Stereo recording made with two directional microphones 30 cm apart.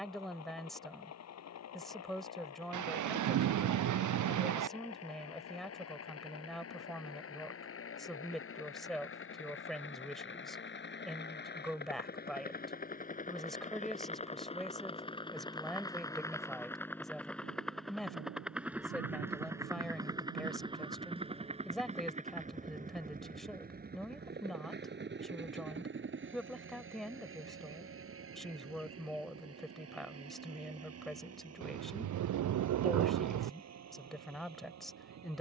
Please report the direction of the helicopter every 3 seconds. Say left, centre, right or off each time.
left, left, left, left, left, centre, centre, right, right, right, right, right.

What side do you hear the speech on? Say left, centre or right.
centre.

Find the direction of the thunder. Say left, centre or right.
right.